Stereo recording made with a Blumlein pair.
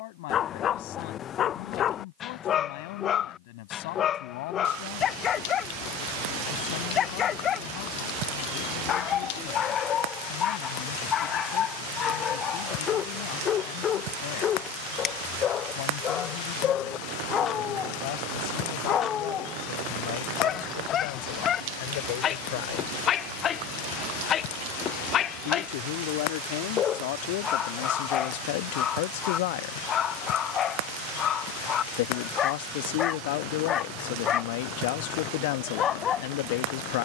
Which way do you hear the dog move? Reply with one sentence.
You can hear the dog stay in one place.